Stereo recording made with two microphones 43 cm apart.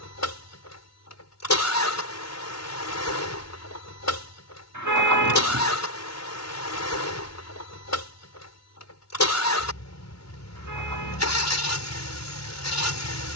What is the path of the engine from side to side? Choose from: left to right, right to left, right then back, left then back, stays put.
stays put.